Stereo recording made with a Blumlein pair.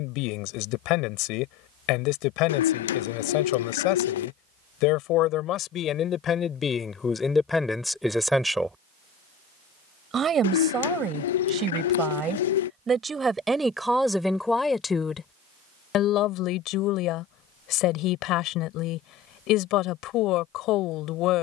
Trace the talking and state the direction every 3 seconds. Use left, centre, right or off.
left, left, centre, right, centre, left, left.